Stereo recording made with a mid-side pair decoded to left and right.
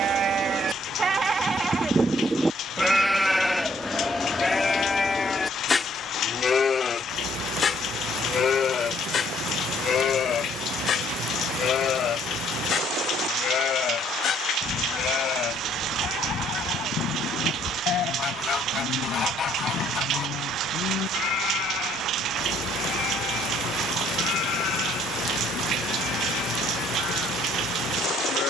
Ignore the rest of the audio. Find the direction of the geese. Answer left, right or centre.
left.